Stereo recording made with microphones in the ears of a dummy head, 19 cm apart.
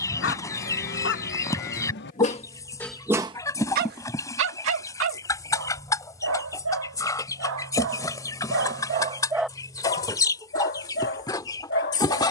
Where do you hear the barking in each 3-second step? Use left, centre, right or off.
left, right, right, left.